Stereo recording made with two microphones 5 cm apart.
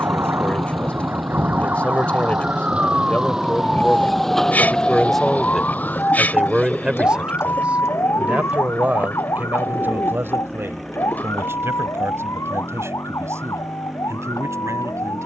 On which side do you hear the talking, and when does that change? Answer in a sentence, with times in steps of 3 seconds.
You can hear the talking on the left from 0 s, in the centre from 3 s and on the right from 6 s.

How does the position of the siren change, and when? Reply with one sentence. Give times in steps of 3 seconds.
In this clip you hear the siren on the right from 0 s, in the centre from 3 s and on the left from 6 s.